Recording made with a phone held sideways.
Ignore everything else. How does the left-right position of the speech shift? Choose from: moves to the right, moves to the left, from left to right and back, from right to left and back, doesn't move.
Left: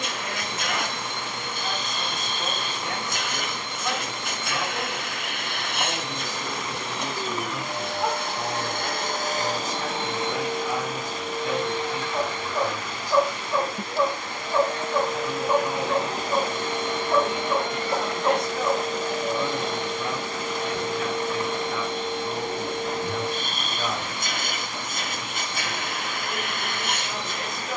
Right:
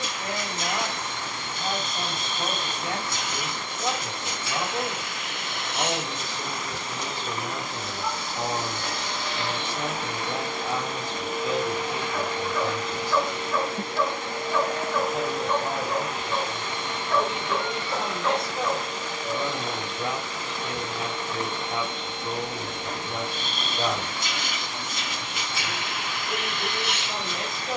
doesn't move.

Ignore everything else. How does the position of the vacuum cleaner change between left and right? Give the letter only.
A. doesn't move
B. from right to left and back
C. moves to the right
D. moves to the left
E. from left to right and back
E.